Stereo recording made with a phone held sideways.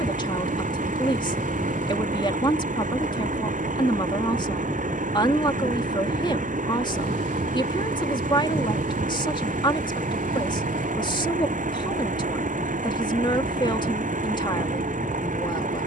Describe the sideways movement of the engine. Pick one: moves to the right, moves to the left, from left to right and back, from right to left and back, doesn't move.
doesn't move.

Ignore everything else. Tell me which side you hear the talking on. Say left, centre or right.
left.